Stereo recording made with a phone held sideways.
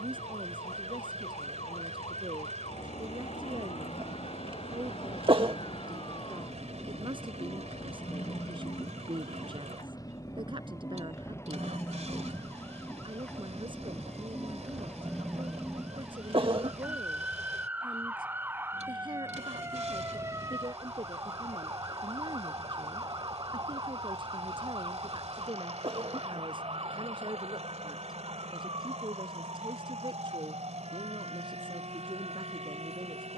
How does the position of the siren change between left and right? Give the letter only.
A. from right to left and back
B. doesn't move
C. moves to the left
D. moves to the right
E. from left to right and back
D.